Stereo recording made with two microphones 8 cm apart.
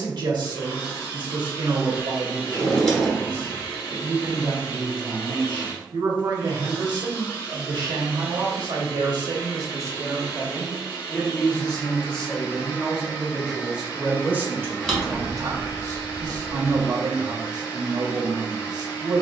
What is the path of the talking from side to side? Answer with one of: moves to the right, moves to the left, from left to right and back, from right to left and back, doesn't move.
from right to left and back.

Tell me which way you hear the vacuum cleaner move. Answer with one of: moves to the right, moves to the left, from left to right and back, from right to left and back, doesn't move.
doesn't move.